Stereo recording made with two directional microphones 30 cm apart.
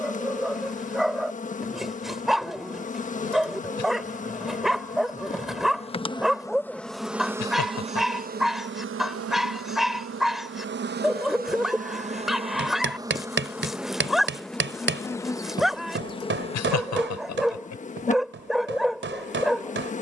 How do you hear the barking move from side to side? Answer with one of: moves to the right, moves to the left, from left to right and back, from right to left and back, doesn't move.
doesn't move.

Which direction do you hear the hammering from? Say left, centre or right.
right.